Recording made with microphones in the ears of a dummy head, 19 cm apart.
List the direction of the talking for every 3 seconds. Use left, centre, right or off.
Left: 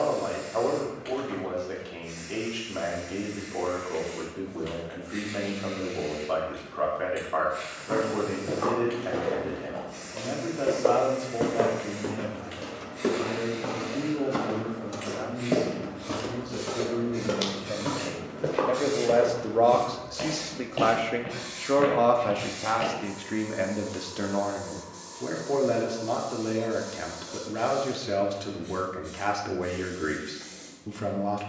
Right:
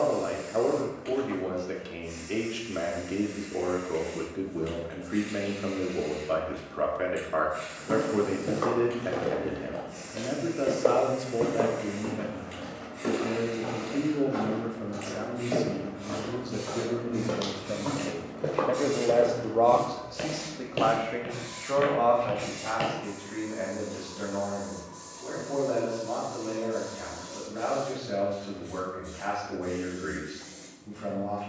right, right, right, right, right, right, centre, left, left, left, left.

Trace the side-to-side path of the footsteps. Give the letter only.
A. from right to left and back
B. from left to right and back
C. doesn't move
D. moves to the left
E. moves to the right
A.